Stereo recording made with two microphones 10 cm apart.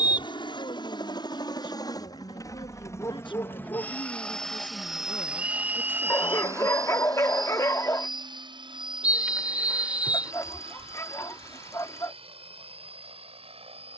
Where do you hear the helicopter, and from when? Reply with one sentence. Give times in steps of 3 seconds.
You can hear the helicopter on the left from 0 s, in the centre from 3 s and on the right from 6 s.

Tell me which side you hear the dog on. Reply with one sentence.
In this clip you hear the dog on the left.